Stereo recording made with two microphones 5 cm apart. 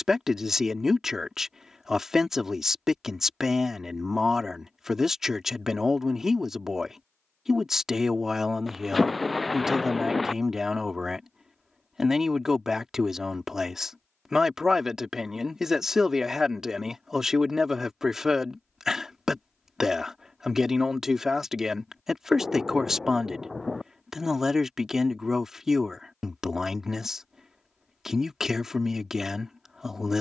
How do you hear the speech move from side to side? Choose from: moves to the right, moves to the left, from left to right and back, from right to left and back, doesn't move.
doesn't move.